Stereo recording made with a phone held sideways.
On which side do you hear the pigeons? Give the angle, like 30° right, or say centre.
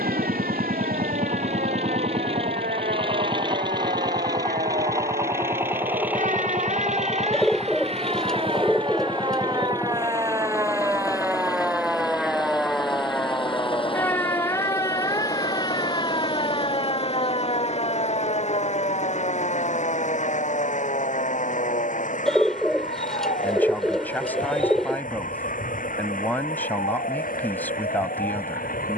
centre.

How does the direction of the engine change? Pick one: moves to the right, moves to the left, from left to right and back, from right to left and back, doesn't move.
moves to the left.